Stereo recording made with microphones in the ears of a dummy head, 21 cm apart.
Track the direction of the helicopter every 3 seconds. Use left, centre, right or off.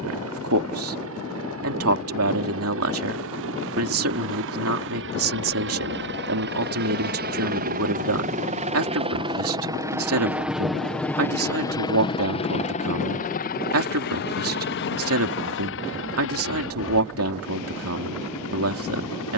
right, right, right, centre, left, left, left.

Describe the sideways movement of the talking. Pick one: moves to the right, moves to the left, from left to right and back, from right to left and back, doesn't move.
doesn't move.